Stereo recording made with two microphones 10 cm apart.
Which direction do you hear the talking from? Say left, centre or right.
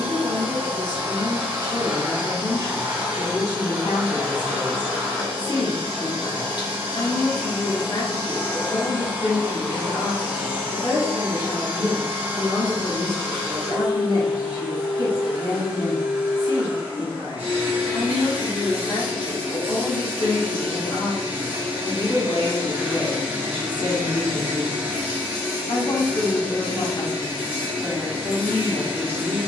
left.